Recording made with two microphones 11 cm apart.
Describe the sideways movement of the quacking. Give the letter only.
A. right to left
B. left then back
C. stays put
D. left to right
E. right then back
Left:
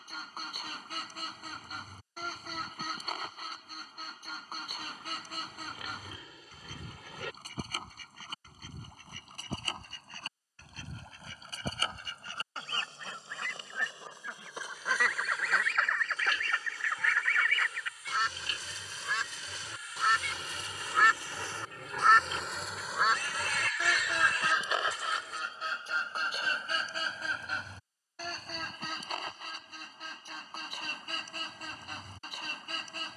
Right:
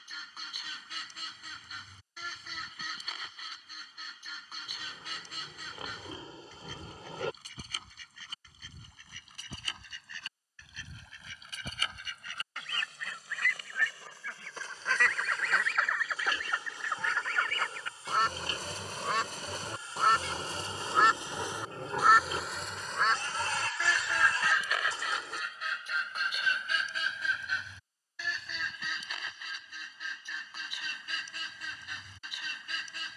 E.